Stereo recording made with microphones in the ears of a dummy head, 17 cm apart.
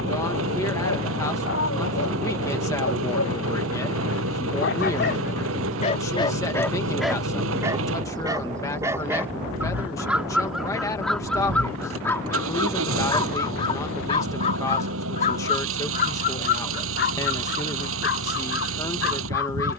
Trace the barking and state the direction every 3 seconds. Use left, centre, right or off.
left, left, centre, centre, left, left, left.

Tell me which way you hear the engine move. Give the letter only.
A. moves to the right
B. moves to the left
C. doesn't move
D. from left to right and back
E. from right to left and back
C.